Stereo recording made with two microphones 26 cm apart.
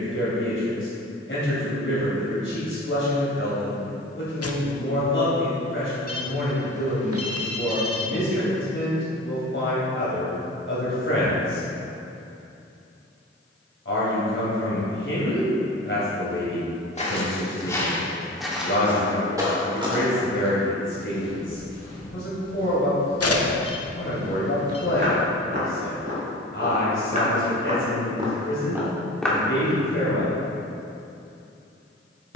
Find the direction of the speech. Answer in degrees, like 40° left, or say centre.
50° left.